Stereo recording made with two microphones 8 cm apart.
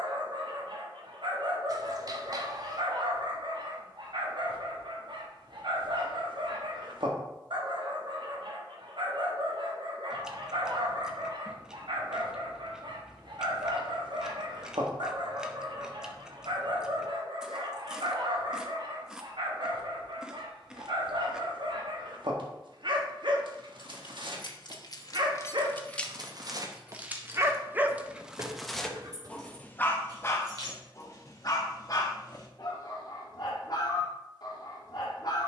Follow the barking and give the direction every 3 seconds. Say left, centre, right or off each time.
right, right, right, right, right, right, right, right, right, centre, left, left.